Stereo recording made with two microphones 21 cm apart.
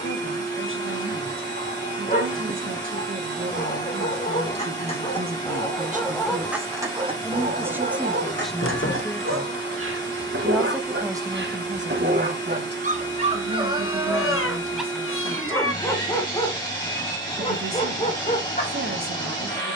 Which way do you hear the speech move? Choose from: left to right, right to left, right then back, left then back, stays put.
left then back.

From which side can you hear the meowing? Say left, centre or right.
left.